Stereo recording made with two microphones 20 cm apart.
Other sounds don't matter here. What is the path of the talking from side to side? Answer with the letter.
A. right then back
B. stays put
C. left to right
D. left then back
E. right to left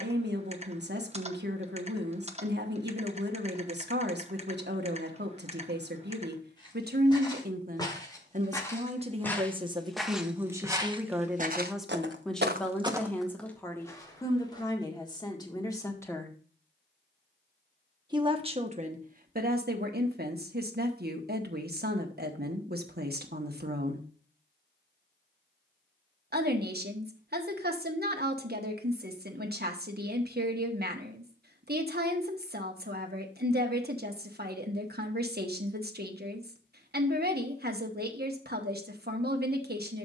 D.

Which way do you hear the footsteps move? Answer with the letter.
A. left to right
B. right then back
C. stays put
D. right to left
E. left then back
B.